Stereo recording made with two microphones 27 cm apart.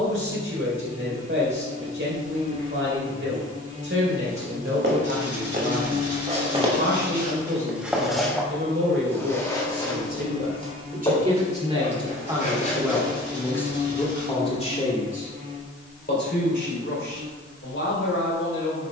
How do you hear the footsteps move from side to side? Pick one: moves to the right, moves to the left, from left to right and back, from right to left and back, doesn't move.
moves to the left.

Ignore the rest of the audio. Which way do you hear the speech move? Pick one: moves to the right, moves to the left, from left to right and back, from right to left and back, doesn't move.
moves to the left.